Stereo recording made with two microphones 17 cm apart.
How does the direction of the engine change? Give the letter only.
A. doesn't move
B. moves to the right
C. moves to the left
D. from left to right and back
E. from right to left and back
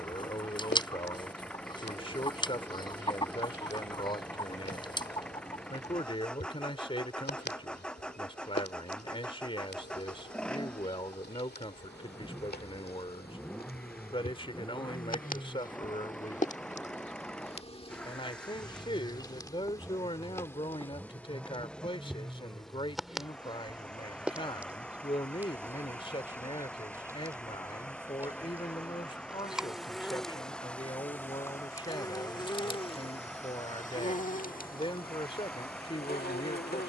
A.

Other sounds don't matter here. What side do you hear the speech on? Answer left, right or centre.
left.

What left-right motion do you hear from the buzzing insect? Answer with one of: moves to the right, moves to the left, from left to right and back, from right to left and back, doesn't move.
from left to right and back.